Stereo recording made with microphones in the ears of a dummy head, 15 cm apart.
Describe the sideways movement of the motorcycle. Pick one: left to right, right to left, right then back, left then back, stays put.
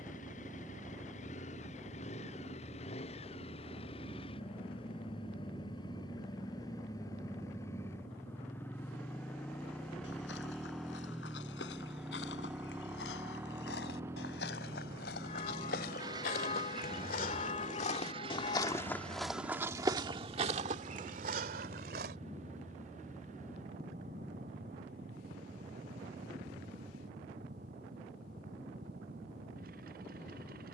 left to right.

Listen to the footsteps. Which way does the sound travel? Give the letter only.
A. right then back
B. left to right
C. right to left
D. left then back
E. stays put
B.